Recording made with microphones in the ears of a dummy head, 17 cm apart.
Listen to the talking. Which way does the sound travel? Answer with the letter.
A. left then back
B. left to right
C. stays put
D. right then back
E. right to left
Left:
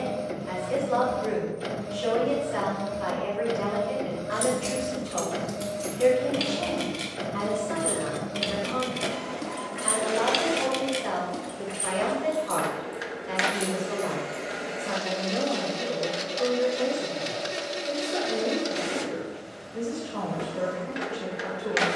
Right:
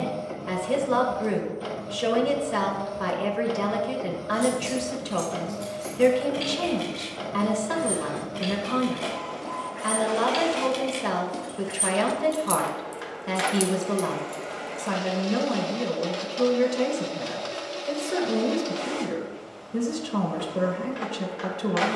C.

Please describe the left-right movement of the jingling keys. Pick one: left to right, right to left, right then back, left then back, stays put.
left to right.